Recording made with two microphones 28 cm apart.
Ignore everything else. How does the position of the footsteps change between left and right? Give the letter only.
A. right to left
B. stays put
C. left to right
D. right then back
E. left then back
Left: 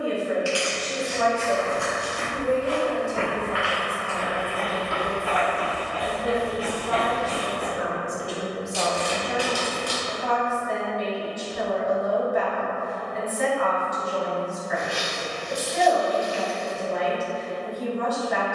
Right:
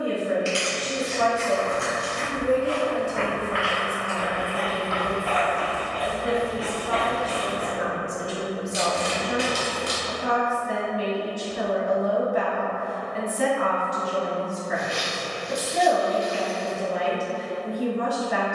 E.